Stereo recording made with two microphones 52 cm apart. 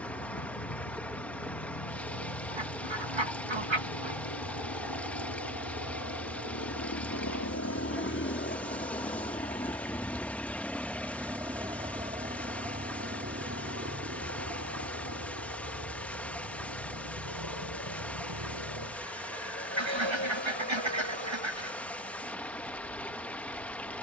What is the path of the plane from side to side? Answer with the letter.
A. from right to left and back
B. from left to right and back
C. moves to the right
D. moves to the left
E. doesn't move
C.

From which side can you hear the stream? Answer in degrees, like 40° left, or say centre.
centre.